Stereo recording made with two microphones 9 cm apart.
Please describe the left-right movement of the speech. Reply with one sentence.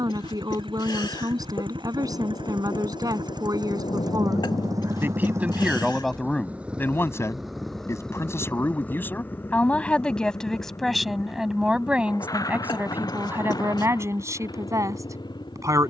You can hear the speech go left and come back.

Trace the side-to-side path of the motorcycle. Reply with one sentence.
You can hear the motorcycle go from the right side to the left.